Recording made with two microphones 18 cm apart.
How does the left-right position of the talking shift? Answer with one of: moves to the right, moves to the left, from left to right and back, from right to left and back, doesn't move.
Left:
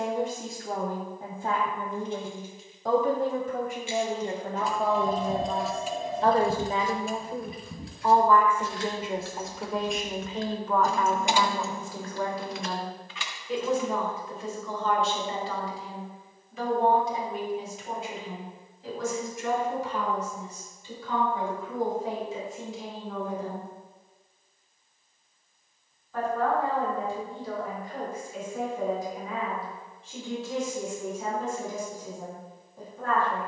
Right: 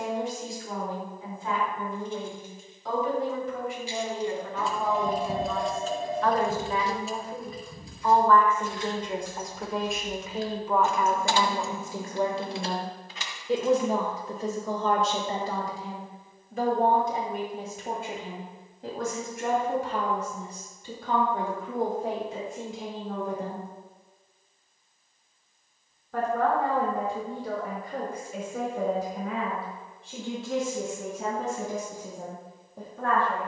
moves to the right.